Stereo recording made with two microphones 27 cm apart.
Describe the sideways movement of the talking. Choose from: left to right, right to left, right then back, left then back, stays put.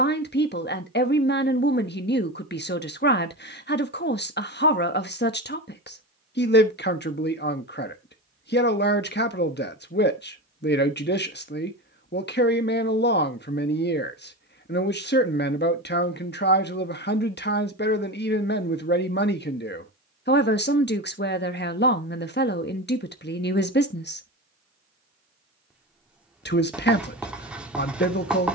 stays put.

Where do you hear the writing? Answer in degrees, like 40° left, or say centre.
centre.